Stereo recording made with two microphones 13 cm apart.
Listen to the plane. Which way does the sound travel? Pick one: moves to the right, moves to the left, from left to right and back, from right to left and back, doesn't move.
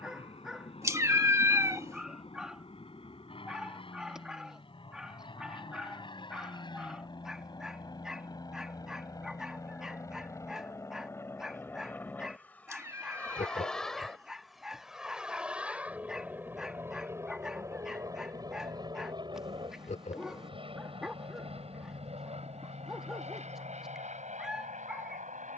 moves to the right.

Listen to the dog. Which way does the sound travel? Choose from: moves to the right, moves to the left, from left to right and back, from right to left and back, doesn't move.
doesn't move.